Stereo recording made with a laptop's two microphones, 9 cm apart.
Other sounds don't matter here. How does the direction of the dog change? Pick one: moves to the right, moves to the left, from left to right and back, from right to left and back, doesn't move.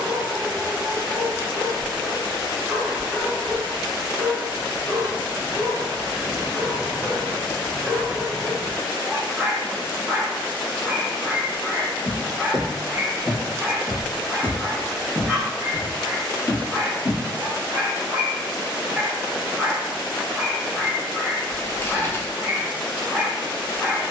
doesn't move.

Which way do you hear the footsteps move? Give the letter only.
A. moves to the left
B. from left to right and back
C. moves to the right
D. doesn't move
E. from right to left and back
B.